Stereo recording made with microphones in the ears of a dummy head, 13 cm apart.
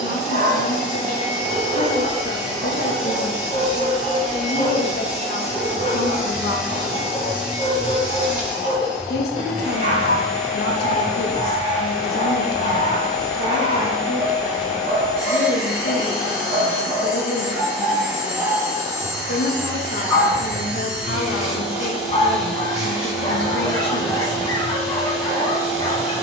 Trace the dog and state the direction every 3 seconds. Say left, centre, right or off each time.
right, right, right, right, right, right, centre, left, left.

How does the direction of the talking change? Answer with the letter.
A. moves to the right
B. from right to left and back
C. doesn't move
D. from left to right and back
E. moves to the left
C.